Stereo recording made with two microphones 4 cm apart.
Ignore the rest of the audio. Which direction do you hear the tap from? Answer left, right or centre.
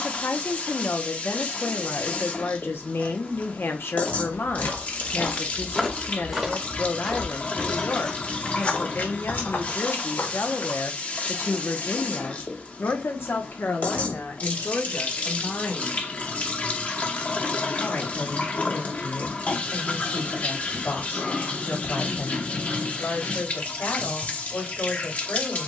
left.